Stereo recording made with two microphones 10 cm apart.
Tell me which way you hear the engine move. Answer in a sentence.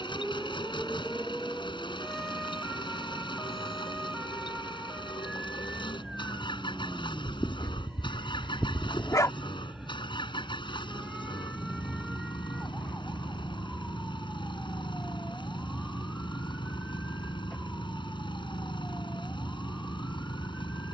In this clip you hear the engine stay in one place.